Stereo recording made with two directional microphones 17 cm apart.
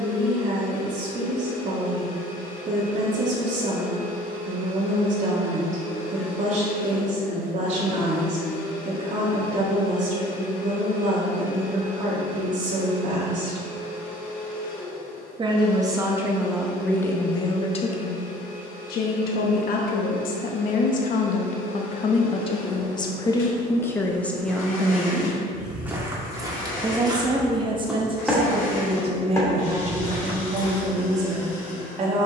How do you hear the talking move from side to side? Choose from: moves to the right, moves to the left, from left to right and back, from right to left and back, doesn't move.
from right to left and back.